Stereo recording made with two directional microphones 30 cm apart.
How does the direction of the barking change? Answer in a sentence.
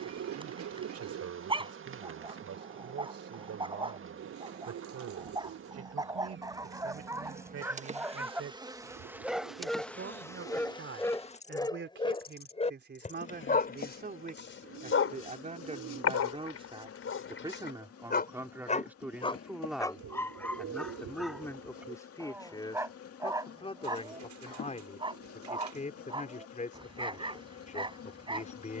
In this clip you hear the barking move from right to left and back again.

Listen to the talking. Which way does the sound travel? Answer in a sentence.
You can hear the talking move to the left.